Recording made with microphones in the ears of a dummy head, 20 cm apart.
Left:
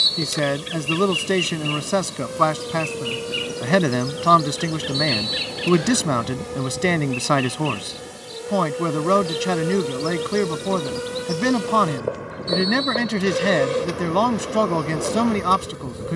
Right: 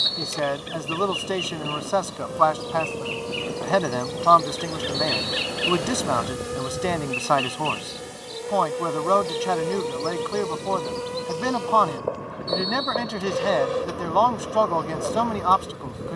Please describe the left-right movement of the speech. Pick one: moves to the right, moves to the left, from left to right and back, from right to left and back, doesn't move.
doesn't move.